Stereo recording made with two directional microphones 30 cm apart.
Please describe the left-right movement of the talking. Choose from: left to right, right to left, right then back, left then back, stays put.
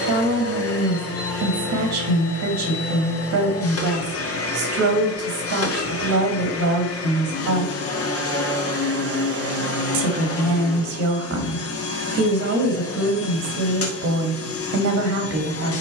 stays put.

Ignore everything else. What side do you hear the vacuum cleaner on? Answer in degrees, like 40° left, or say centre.
50° left.